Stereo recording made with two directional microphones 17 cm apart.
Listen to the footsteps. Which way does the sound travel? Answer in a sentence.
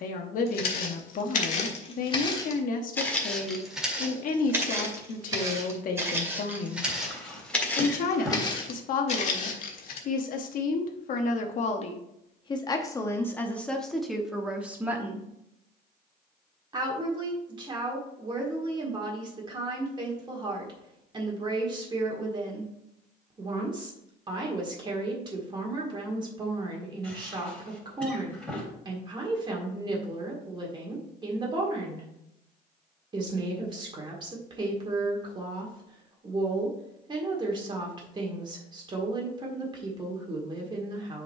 In this clip you hear the footsteps move from left to right and back again.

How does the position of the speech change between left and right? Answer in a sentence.
In this clip you hear the speech travel towards the right.